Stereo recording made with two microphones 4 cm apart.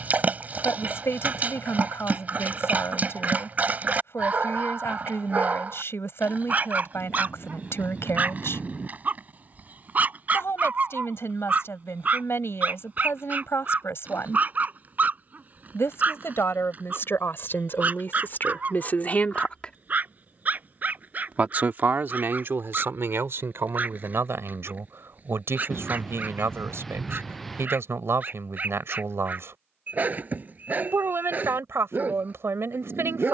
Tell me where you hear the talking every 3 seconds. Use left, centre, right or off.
left, left, left, left, left, left, left, right, right, right, right.